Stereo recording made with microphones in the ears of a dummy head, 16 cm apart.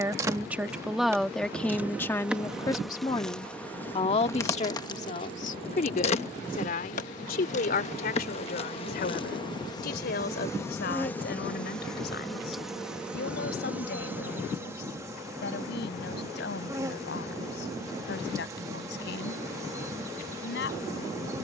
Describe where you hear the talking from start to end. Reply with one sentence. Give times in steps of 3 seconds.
You can hear the talking in the centre from 0 s and on the left from 3 s.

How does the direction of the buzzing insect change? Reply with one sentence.
You can hear the buzzing insect go left and come back.